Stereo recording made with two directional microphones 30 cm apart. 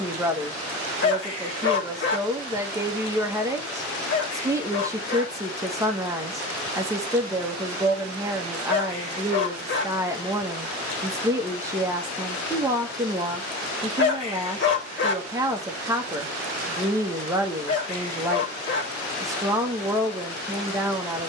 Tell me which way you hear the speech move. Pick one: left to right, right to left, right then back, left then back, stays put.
stays put.